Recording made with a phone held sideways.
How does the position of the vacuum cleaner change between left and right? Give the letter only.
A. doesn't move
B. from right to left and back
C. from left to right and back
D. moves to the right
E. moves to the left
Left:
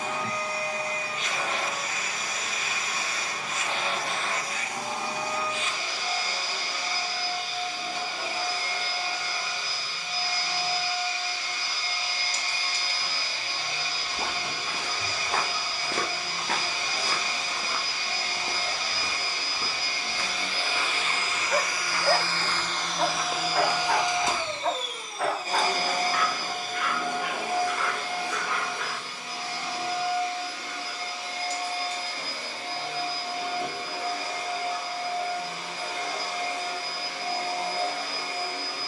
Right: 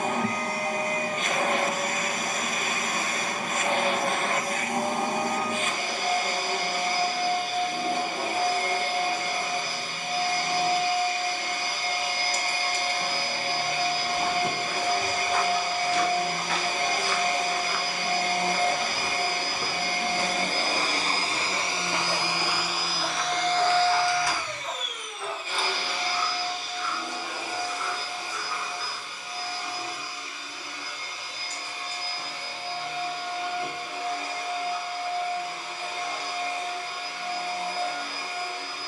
E.